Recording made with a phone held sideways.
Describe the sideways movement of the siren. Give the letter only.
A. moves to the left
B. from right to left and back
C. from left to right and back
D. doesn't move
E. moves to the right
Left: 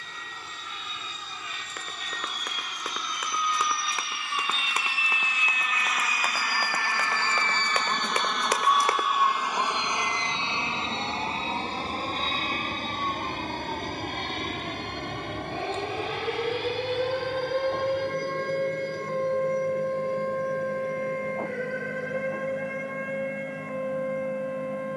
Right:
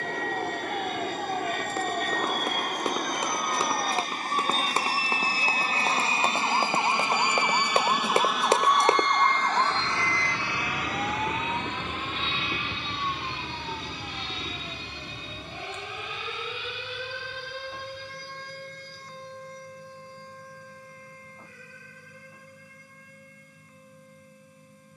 A.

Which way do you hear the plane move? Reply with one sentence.
In this clip you hear the plane travel towards the left.